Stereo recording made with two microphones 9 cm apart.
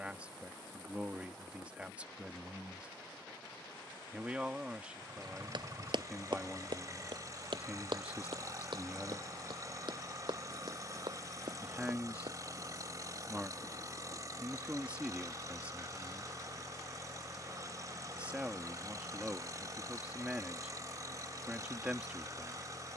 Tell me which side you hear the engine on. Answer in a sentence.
In this clip you hear the engine on the right.